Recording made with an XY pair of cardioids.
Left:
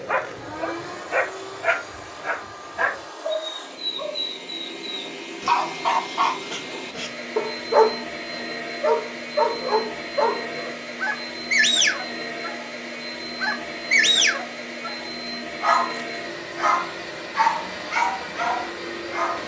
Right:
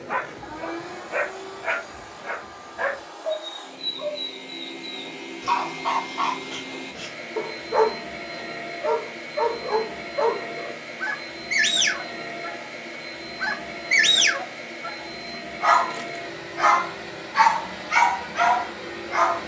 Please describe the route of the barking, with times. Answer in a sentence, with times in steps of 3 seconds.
You can hear the barking on the left from 0 s, in the centre from 12 s and on the right from 15 s.